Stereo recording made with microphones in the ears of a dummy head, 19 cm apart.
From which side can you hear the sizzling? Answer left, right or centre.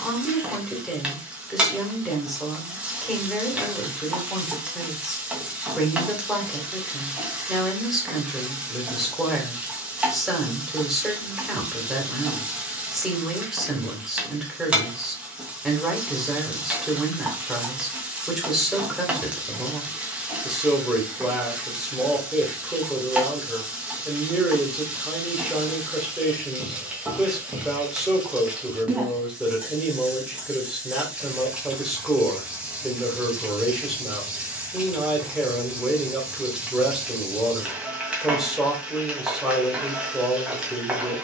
centre.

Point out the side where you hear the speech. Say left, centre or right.
centre.